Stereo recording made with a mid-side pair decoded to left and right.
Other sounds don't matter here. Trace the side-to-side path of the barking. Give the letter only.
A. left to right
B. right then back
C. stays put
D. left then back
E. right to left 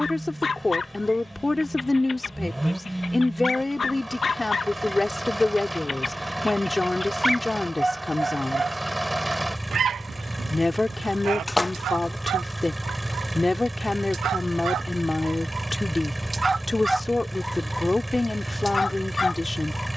B.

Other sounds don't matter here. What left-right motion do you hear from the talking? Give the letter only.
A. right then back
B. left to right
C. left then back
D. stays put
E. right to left
D.